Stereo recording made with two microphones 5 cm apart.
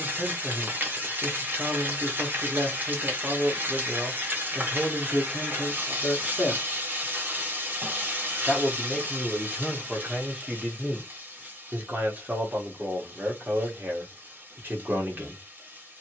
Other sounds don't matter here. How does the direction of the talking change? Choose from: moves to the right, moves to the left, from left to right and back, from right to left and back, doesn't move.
from right to left and back.